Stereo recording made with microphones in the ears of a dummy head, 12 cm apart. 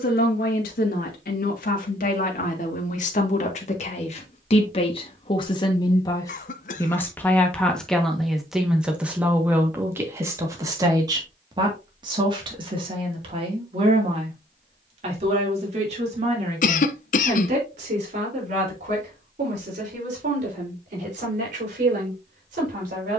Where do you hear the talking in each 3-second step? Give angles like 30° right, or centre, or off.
60° left, 40° left, 10° left, 20° right, 40° right, 50° right, 50° right, 60° right.